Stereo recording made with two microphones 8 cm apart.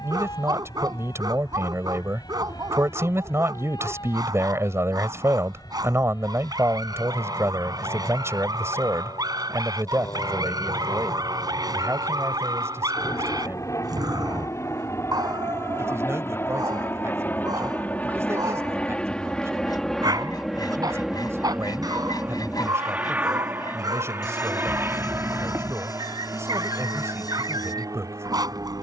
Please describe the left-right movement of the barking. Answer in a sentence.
You can hear the barking stay put.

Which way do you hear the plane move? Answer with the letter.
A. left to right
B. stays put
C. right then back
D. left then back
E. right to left
A.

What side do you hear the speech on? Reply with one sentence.
You can hear the speech on the right.